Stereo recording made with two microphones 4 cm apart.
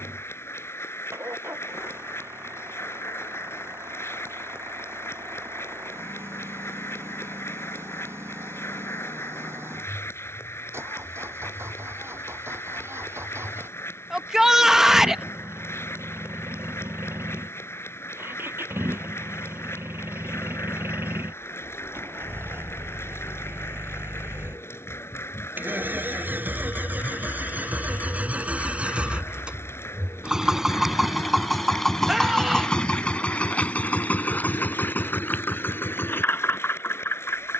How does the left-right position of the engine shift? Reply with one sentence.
In this clip you hear the engine move from right to left.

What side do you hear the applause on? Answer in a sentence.
In this clip you hear the applause on the left.